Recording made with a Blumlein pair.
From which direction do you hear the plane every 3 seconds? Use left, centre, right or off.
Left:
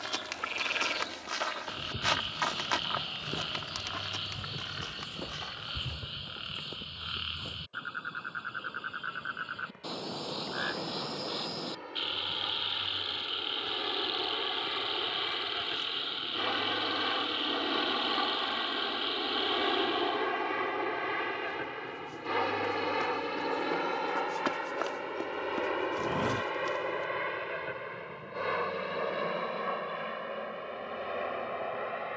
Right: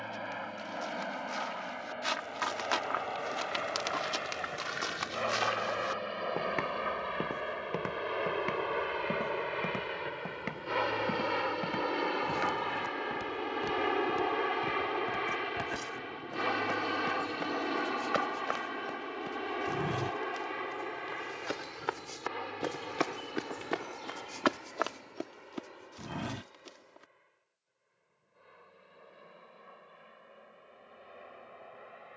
right, right, right, right, right, centre, centre, left, left, left, left.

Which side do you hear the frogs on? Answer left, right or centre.
left.